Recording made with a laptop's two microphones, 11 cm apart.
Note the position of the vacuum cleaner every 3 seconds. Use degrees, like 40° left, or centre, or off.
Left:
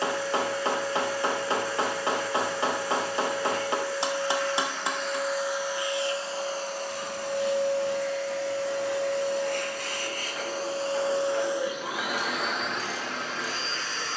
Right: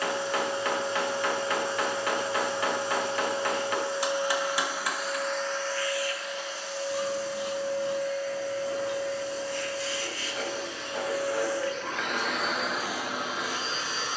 20° right, 10° right, 60° left, 40° left, 10° right.